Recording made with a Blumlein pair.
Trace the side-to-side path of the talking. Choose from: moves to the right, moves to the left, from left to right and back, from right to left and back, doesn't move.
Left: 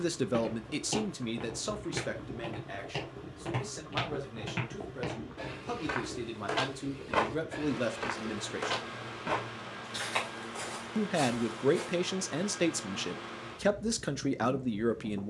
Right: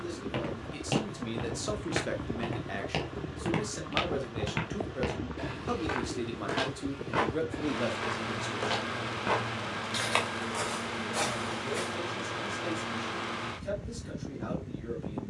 from left to right and back.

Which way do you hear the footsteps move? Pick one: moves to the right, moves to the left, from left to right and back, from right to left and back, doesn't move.
from right to left and back.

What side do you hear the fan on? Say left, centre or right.
right.